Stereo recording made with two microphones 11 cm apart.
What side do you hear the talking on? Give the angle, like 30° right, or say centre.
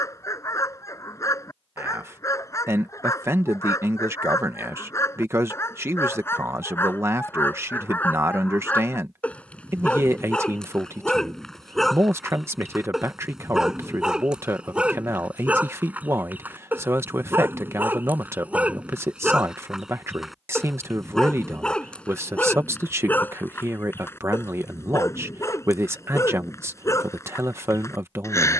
20° right.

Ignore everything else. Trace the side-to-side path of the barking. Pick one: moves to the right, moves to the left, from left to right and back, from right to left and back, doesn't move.
from left to right and back.